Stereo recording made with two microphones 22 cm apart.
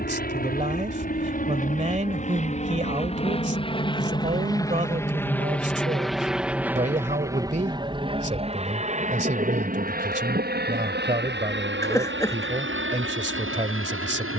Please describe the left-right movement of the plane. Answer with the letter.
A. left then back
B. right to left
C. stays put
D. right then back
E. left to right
E.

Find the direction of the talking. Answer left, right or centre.
right.